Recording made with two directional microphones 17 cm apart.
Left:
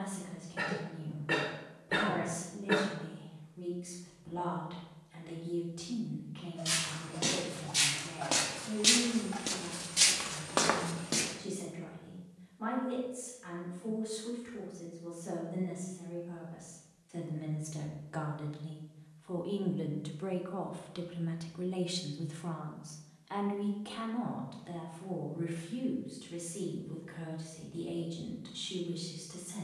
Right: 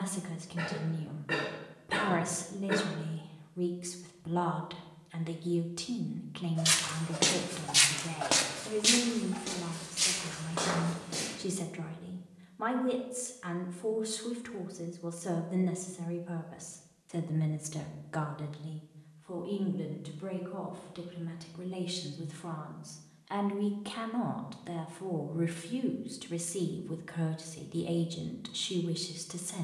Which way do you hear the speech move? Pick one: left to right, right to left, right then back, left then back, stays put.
left then back.